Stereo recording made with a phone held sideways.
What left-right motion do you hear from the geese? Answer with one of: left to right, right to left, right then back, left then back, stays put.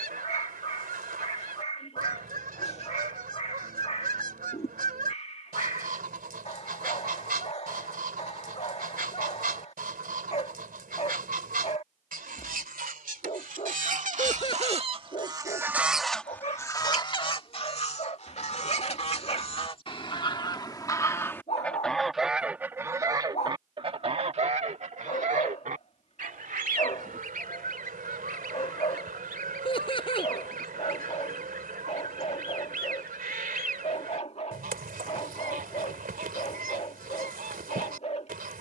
left then back.